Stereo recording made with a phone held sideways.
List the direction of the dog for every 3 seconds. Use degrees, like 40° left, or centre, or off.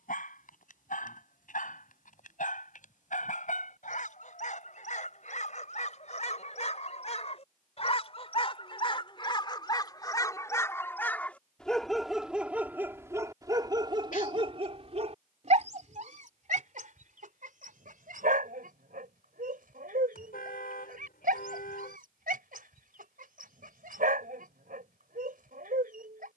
60° left, 60° left, 40° left, 20° left, 20° right, 60° right, 70° right, 70° right, 70° right.